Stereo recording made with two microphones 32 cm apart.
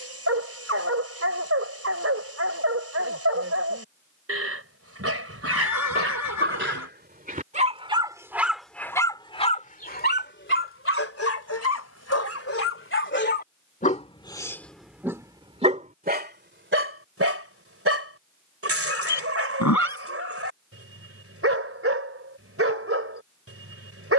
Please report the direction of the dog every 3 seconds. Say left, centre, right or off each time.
right, right, right, left, left, right, right, right.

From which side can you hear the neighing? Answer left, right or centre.
left.